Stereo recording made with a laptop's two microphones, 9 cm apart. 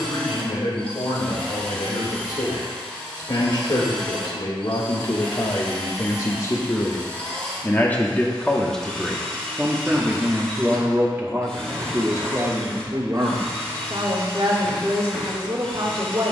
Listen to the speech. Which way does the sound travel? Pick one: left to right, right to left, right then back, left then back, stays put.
left to right.